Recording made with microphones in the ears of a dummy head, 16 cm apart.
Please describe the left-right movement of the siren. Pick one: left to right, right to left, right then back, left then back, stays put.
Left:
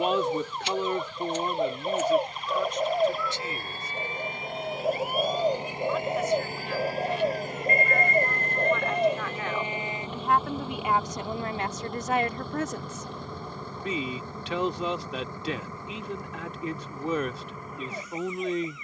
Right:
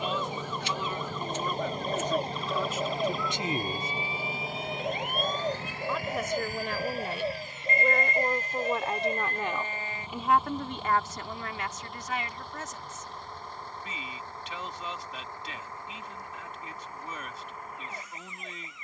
right to left.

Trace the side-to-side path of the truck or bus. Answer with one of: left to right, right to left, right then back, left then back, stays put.
right to left.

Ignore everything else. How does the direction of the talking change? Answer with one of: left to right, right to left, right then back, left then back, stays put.
right then back.